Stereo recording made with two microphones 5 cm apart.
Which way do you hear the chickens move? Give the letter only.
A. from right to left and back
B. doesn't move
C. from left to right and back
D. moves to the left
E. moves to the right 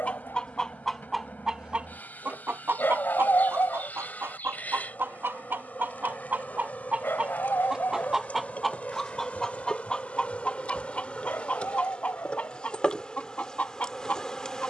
C.